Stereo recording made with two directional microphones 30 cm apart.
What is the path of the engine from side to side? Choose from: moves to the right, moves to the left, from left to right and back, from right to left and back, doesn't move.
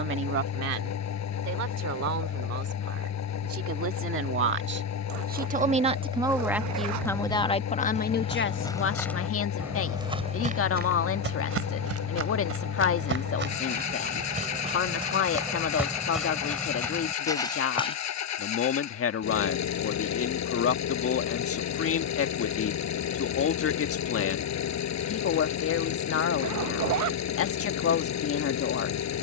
doesn't move.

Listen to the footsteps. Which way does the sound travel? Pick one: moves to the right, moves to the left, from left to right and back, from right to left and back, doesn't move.
from left to right and back.